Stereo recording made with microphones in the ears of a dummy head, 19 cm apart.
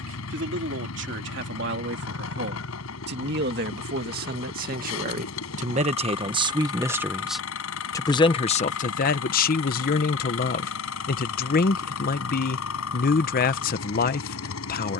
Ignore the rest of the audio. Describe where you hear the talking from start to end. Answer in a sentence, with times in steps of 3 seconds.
In this clip you hear the talking on the right from 0 s, in the centre from 6 s and on the left from 9 s.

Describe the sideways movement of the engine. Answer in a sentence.
You can hear the engine stay put.